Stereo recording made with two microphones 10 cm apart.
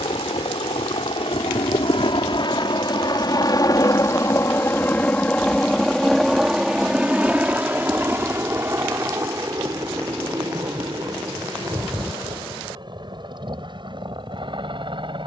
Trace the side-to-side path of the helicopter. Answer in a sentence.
In this clip you hear the helicopter travel towards the right.